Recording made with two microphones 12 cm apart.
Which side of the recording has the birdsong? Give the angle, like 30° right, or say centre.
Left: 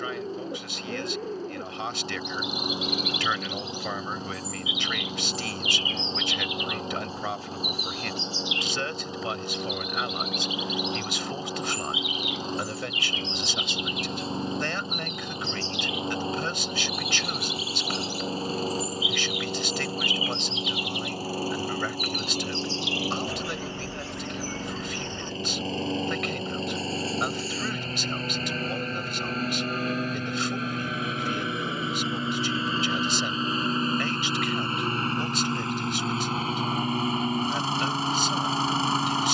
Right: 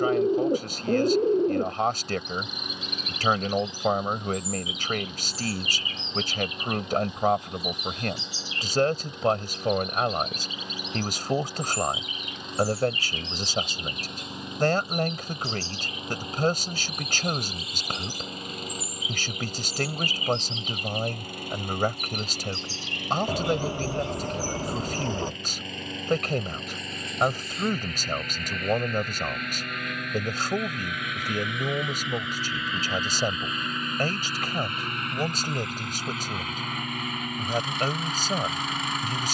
40° right.